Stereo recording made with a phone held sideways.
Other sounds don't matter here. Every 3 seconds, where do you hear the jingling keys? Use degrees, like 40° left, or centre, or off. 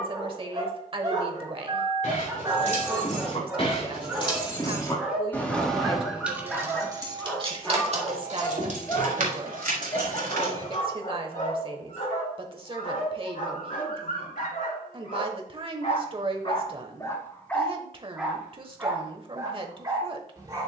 50° left, 30° left, 30° right, 60° right, off, off, off.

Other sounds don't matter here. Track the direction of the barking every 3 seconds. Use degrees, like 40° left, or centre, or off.
30° right, 10° right, 10° left, 40° left, 60° left, 40° left, 20° right.